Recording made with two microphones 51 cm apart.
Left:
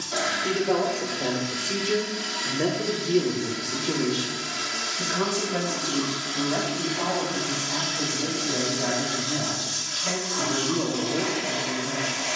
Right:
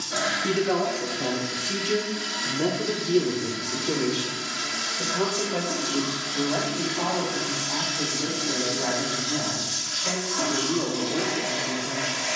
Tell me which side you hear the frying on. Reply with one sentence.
You can hear the frying on the right.